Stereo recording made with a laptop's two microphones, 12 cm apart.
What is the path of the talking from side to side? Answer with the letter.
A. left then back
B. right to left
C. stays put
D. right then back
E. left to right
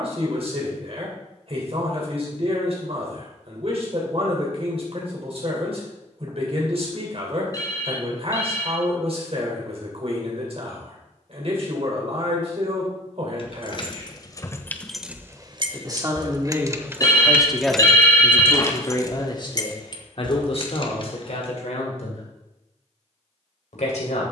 B.